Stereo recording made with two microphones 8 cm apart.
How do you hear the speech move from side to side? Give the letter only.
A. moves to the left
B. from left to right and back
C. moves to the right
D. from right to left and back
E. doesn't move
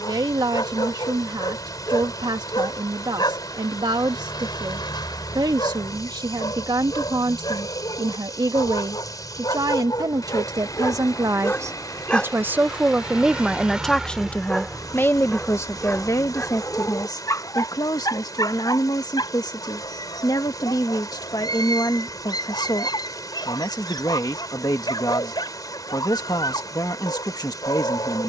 A.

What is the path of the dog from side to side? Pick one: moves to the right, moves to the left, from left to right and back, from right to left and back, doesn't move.
from left to right and back.